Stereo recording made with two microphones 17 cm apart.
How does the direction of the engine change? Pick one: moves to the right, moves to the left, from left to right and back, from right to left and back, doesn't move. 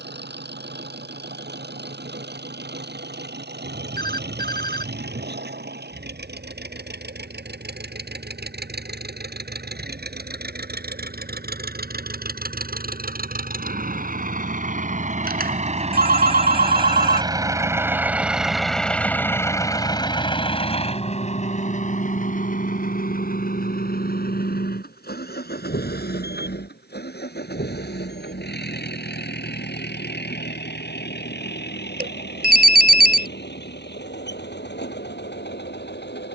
moves to the left.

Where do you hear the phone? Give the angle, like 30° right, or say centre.
60° right.